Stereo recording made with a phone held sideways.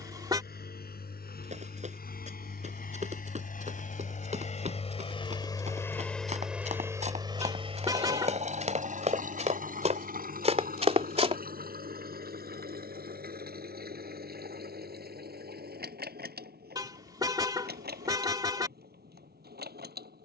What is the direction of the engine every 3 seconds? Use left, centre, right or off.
left, left, right, right, right, right, right.